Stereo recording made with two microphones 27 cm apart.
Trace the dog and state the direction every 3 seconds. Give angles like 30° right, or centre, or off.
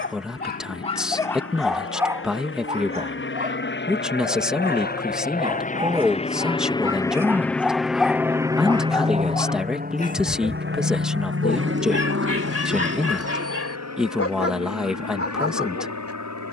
10° left, 30° right, centre, 30° left, 60° left, 60° left.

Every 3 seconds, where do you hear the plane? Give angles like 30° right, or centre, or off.
60° left, 40° left, centre, 40° right, 60° right, 70° right.